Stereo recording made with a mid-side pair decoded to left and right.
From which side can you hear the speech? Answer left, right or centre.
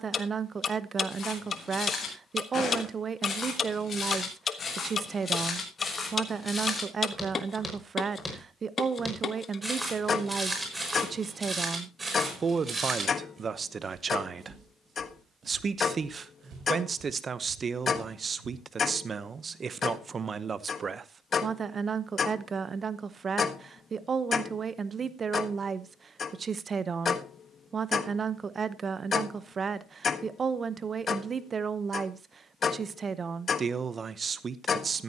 right.